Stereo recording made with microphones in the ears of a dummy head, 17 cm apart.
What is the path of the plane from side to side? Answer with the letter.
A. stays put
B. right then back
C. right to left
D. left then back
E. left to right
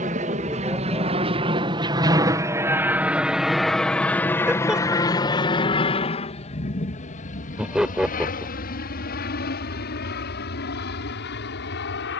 C.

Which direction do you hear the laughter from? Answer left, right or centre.
centre.